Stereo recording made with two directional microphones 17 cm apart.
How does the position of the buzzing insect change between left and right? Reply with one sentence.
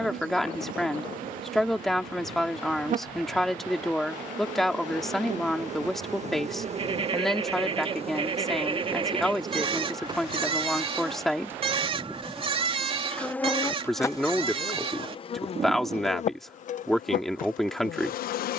In this clip you hear the buzzing insect travel towards the left.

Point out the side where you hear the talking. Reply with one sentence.
In this clip you hear the talking in the centre.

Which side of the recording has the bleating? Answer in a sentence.
In this clip you hear the bleating on the right.